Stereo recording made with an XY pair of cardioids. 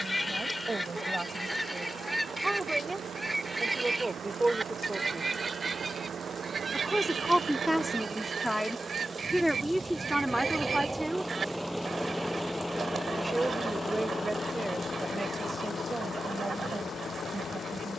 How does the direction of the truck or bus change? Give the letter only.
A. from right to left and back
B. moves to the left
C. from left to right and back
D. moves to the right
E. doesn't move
B.